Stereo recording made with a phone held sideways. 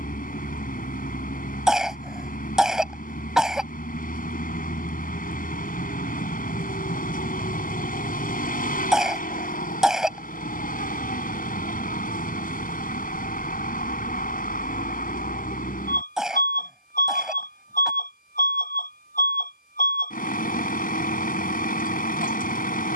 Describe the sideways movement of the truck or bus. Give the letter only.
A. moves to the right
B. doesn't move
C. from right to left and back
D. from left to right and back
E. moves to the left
B.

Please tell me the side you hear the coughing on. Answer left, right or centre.
centre.